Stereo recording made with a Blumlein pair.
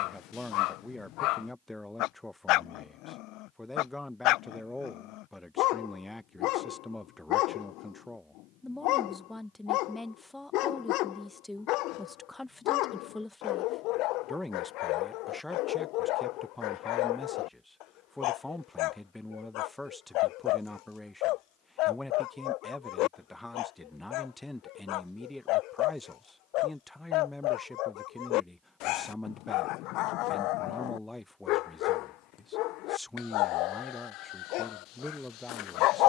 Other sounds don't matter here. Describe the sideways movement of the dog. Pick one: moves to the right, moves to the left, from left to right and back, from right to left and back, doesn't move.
doesn't move.